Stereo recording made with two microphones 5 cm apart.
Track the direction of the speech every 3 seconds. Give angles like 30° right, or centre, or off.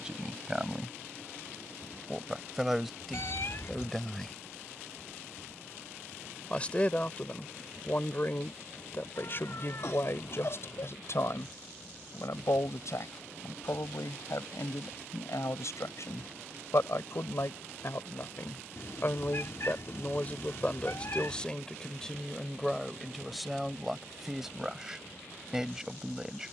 10° right, centre, 30° left, 50° left, 70° left, 70° left, 30° left, centre, 10° right.